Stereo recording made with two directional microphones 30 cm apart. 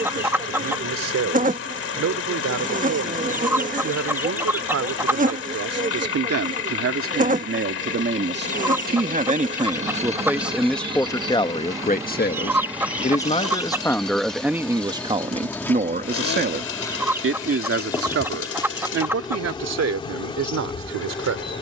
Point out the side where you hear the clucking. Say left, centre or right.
centre.